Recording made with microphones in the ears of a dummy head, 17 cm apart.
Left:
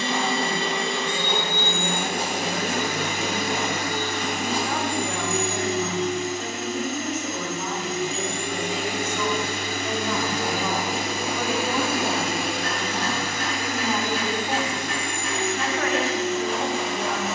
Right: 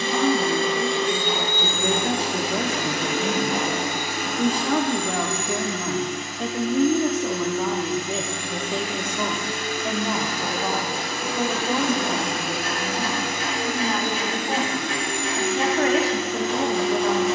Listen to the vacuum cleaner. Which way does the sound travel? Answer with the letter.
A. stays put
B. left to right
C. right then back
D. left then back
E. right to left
D.